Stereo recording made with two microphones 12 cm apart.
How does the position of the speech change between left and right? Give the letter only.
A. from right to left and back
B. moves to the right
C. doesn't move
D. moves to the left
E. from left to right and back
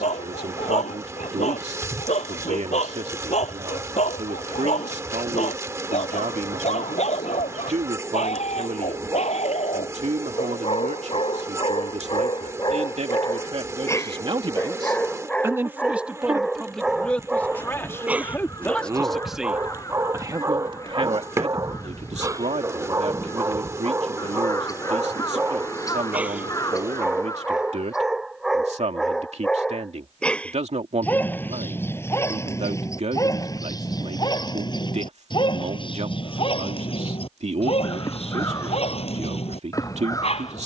A.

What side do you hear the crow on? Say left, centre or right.
left.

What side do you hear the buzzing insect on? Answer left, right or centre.
right.